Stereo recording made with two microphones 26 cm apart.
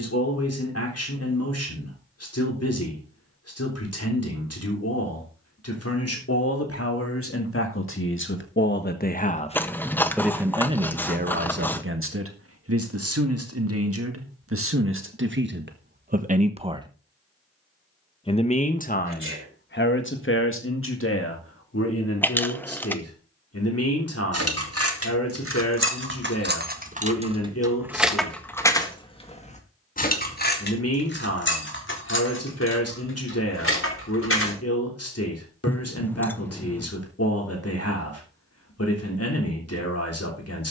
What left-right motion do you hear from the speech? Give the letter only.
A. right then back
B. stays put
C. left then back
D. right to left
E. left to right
A.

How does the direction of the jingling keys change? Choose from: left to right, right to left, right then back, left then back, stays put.
right to left.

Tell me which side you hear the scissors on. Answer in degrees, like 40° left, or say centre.
10° left.